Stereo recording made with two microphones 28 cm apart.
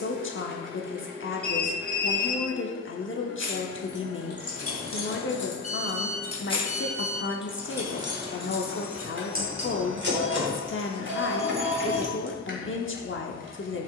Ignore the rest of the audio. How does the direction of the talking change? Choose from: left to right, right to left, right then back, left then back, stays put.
stays put.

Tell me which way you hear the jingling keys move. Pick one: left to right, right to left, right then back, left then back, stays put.
left to right.